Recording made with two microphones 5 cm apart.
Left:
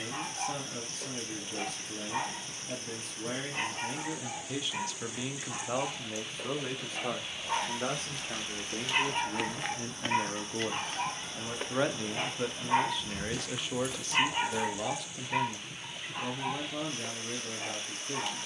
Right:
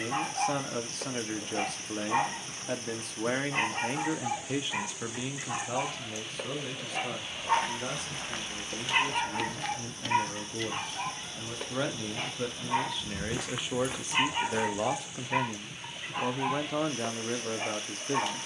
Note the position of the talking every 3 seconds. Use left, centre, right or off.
right, right, left, left, centre, right.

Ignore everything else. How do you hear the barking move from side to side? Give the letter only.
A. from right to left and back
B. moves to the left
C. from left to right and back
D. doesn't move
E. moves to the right
A.